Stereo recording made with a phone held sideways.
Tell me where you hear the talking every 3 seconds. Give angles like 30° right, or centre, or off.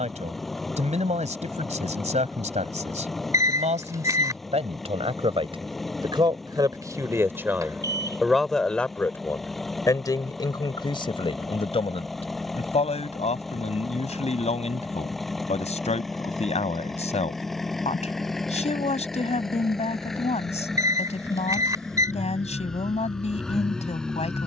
60° right, 50° right, 10° right, 30° left, 50° left, 50° left, 50° left, 50° left.